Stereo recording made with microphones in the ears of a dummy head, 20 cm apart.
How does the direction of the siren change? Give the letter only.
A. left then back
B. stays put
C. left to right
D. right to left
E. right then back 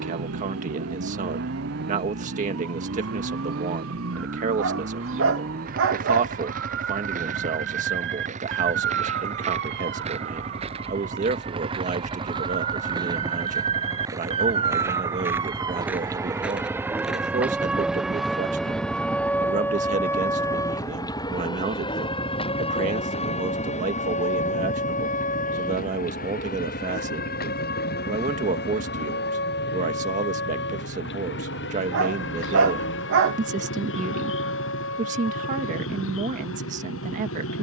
D.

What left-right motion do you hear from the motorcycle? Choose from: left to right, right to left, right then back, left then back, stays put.
right to left.